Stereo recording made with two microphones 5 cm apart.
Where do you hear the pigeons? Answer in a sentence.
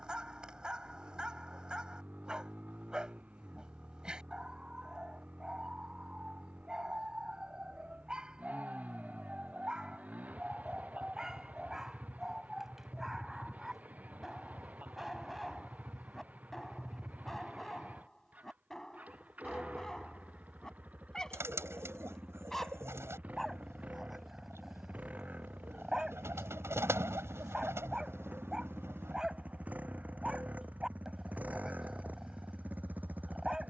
You can hear the pigeons on the right.